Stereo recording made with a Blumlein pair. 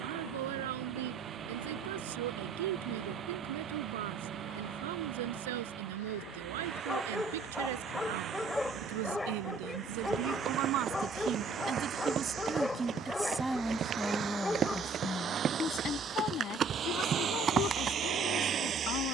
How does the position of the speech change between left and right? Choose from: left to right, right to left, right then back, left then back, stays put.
right to left.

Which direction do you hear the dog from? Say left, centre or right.
centre.